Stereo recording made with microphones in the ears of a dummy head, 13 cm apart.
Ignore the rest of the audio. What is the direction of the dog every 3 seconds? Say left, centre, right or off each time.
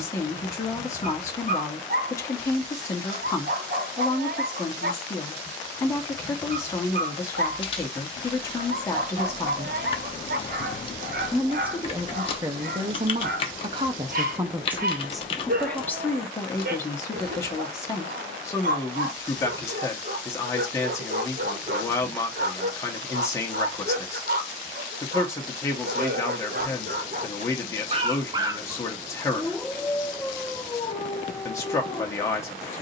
right, right, right, right, right, right, right, right, right, right, left.